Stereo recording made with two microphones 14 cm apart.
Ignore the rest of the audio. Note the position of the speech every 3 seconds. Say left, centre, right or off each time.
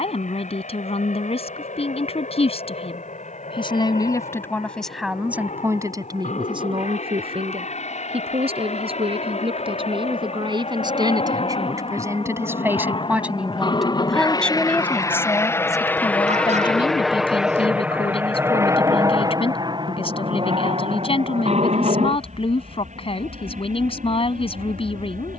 left, centre, right, right, centre, left, left, left, left.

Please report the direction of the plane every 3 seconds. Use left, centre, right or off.
left, left, left, left, left, centre, right, right, right.